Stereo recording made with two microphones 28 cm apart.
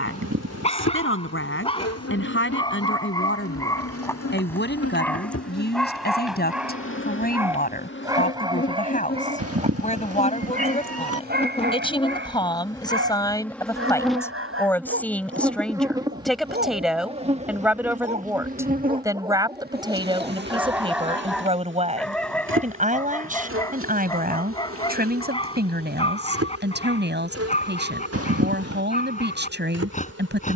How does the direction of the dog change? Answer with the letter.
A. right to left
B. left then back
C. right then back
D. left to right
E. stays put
C.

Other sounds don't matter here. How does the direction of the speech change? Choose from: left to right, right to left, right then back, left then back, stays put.
left to right.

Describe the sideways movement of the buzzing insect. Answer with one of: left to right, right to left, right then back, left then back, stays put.
left to right.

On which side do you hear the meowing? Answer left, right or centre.
right.